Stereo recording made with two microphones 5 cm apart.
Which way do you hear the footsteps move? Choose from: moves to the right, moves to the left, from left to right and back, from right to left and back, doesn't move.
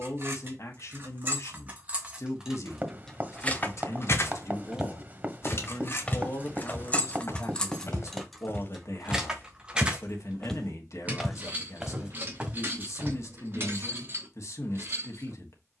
from right to left and back.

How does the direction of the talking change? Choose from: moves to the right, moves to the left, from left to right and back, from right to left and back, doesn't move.
doesn't move.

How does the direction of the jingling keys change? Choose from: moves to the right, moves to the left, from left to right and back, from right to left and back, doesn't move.
from right to left and back.